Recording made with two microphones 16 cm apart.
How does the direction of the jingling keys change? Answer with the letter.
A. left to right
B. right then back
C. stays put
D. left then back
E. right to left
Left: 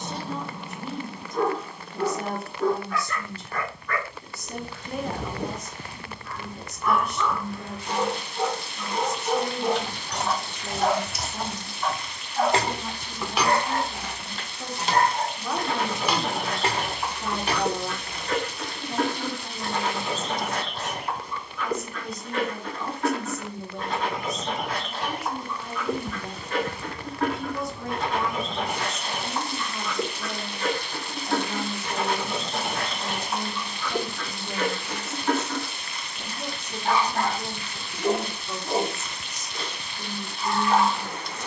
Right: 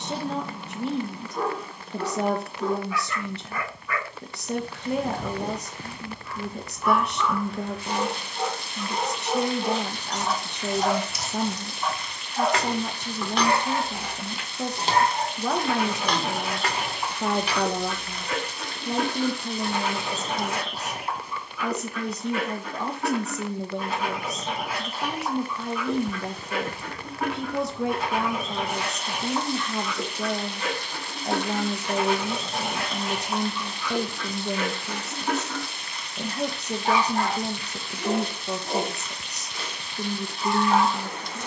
B.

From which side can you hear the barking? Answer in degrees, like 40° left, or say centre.
10° right.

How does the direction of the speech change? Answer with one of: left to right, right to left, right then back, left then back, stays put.
stays put.